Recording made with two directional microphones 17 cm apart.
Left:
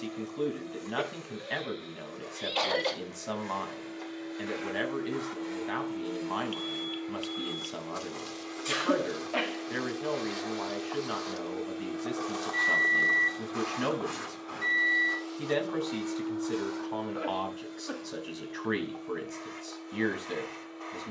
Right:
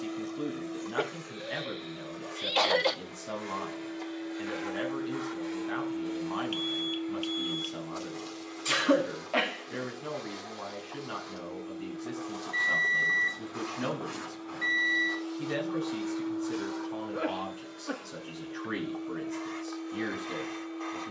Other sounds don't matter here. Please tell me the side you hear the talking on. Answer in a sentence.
You can hear the talking on the left.